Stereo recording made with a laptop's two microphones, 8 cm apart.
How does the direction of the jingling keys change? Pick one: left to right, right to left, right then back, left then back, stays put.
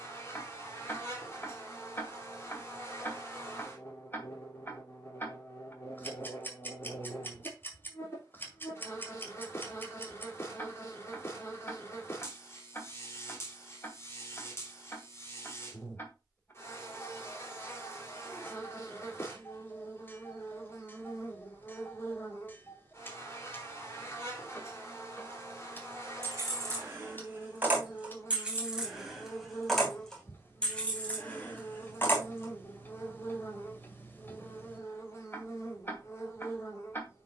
right to left.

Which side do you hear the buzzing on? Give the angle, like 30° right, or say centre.
30° left.